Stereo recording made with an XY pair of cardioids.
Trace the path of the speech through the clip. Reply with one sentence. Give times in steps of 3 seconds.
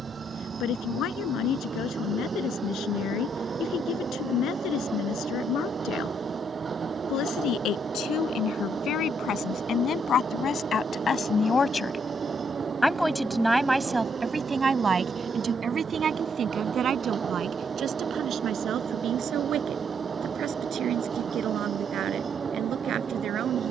In this clip you hear the speech on the left from 0 s, in the centre from 12 s and on the right from 15 s.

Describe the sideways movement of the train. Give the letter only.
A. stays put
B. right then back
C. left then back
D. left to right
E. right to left
A.